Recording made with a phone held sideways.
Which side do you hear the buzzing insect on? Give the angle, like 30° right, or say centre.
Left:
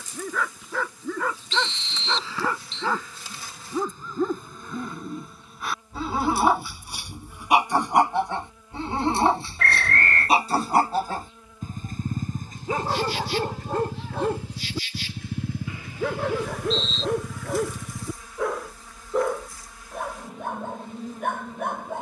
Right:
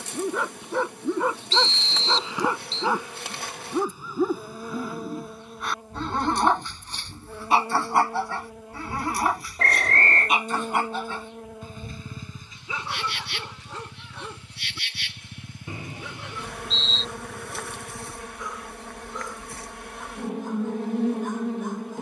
70° right.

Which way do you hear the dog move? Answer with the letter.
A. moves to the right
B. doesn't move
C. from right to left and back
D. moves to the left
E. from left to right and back
D.